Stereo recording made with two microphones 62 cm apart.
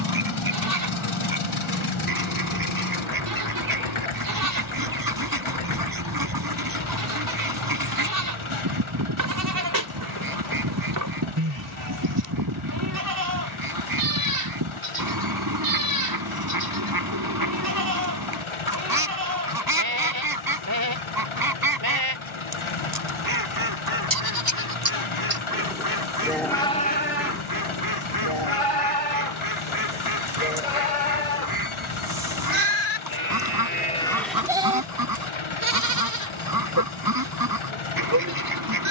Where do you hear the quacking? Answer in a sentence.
In this clip you hear the quacking on the right.